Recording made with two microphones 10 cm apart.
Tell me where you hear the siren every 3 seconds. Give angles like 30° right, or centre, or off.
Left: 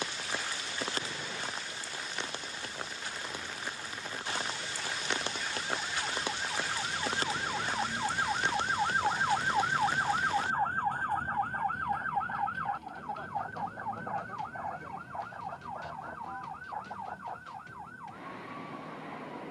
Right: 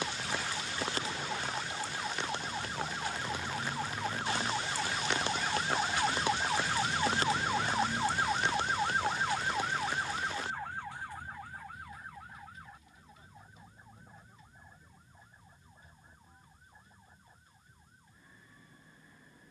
60° right, 50° right, 20° right, 40° left, 70° left, 80° left, 80° left.